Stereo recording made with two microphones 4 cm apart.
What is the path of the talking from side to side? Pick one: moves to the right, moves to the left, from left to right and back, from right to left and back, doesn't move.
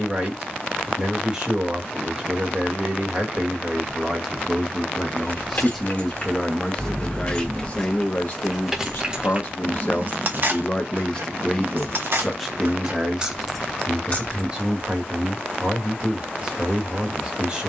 from right to left and back.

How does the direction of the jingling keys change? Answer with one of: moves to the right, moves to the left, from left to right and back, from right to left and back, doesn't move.
from left to right and back.